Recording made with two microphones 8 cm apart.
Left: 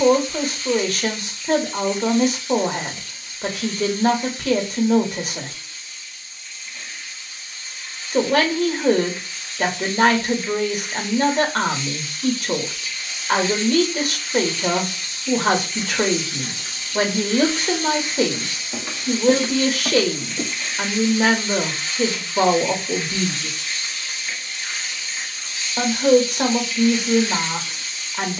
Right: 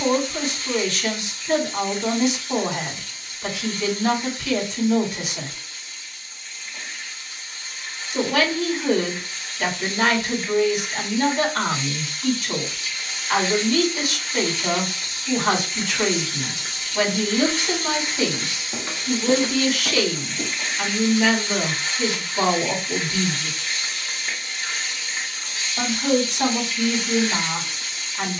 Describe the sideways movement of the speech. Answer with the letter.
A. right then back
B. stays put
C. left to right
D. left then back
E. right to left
B.